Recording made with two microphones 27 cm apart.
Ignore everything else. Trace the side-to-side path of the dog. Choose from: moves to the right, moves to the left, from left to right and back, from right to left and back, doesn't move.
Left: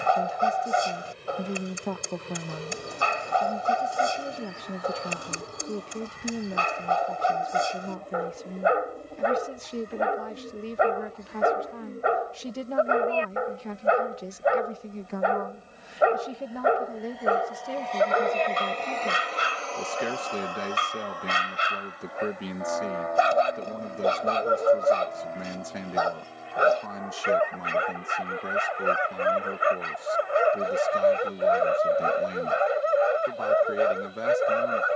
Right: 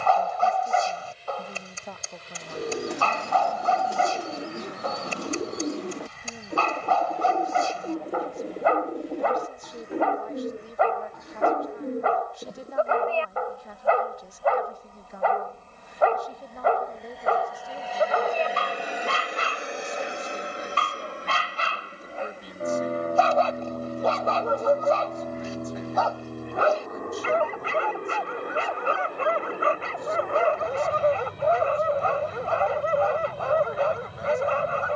doesn't move.